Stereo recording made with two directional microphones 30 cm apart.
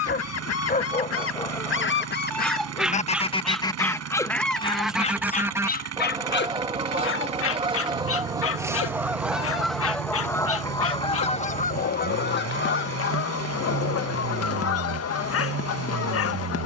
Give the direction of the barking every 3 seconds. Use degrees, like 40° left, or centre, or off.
10° left, 10° left, 40° left, 50° left, 50° left, 50° left.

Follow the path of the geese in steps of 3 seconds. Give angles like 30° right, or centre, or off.
40° left, centre, 10° right, 10° left, 50° left, 50° left.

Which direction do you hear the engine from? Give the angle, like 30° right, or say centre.
60° right.